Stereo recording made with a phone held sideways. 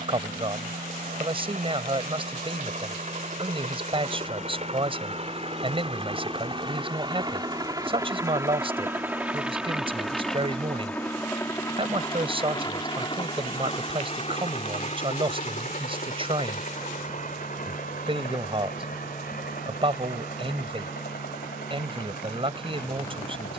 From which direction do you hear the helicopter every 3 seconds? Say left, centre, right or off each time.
right, right, right, centre, left, left, left, left.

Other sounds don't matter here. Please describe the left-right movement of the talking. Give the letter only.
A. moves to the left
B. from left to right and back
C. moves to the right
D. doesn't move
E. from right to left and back
D.